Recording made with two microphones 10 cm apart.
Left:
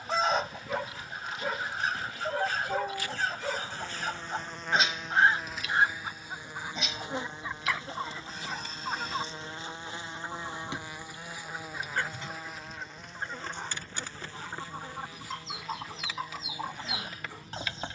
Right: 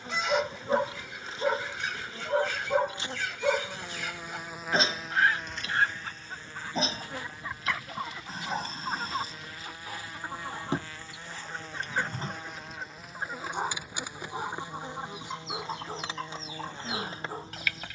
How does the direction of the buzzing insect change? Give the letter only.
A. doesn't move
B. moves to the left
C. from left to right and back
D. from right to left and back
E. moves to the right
D.